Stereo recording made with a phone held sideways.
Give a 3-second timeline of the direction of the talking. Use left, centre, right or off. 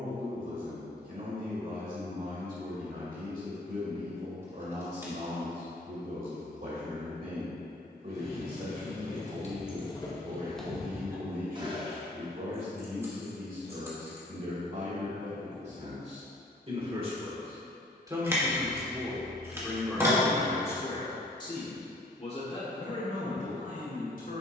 right, right, right, right, right, right, centre, left.